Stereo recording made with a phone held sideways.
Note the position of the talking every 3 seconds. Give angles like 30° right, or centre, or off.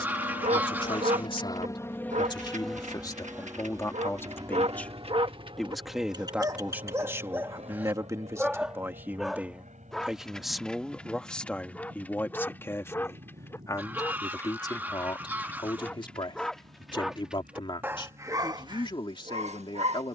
40° left, 10° left, 20° right, centre, 20° left, 30° left, 30° left.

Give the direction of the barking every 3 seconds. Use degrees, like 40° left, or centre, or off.
60° right, 50° right, 20° right, 10° left, 20° left, centre, 40° right.